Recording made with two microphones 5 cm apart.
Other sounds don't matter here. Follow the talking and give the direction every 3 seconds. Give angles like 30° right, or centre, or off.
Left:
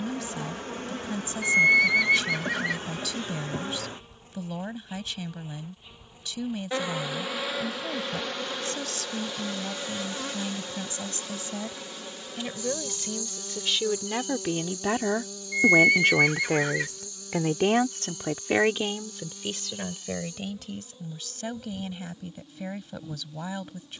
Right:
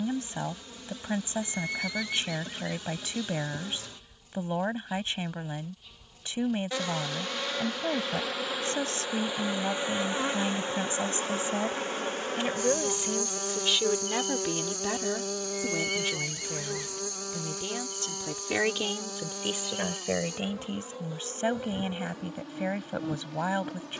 30° right, 30° right, 30° right, 30° right, centre, 60° left, 10° right, 30° right.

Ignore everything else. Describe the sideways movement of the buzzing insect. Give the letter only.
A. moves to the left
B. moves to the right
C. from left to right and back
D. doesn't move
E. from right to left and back
B.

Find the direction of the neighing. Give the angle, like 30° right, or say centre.
80° left.